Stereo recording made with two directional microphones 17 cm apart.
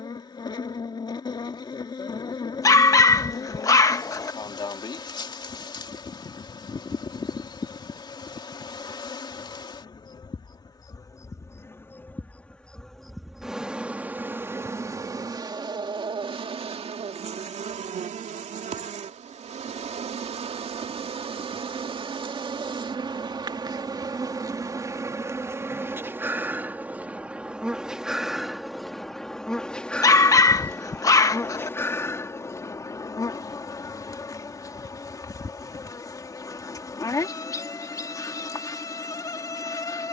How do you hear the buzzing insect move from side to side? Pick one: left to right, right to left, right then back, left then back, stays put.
right then back.